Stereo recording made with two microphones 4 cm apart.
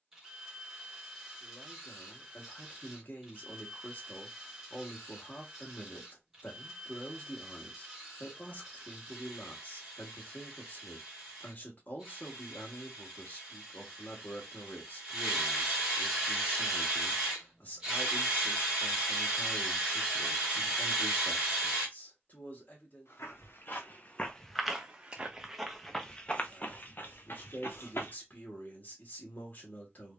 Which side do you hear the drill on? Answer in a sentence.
In this clip you hear the drill in the centre.